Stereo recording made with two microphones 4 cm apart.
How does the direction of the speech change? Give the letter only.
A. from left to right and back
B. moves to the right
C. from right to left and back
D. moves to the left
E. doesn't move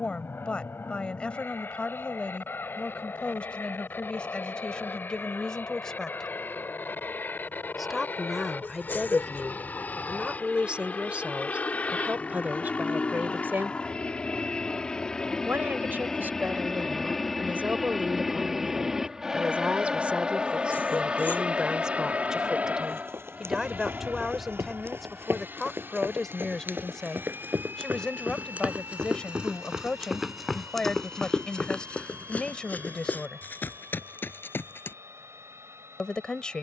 A.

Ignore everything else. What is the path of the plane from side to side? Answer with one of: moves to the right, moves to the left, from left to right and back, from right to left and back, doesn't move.
moves to the right.